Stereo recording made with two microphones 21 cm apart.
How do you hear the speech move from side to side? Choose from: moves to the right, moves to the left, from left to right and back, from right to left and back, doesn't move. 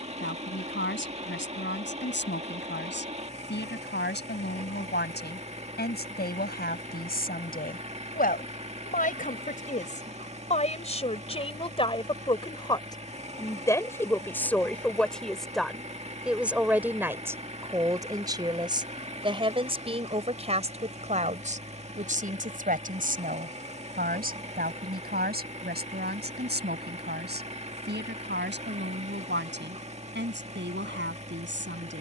moves to the right.